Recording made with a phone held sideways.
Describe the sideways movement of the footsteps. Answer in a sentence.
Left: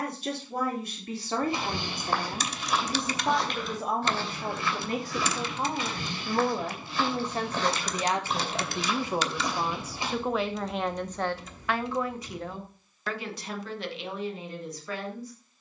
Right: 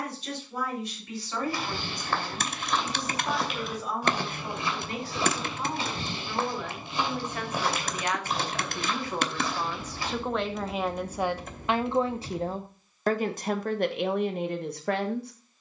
You can hear the footsteps move from left to right and back again.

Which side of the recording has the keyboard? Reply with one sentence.
In this clip you hear the keyboard on the right.